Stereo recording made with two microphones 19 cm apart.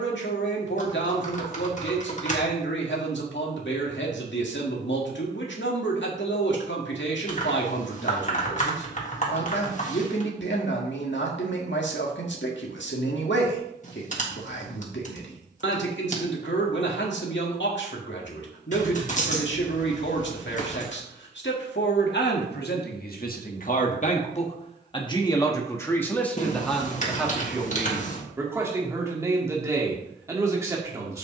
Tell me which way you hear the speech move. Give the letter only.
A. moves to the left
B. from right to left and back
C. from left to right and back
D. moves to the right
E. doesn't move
D.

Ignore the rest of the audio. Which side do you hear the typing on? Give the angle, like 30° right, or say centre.
40° left.